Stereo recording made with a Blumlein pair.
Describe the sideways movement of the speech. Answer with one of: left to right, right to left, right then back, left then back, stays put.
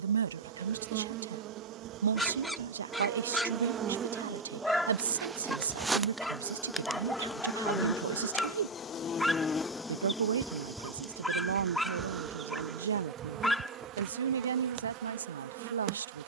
stays put.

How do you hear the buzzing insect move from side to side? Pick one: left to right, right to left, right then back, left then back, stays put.
left then back.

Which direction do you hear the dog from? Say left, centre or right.
centre.